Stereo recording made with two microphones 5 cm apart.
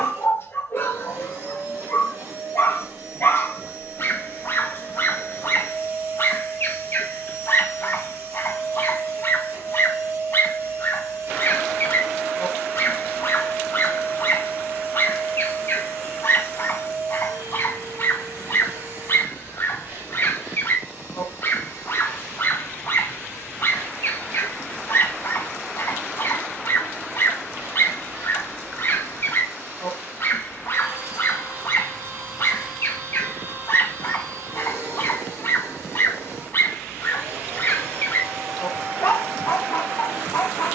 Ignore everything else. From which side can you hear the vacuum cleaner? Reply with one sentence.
You can hear the vacuum cleaner on the right.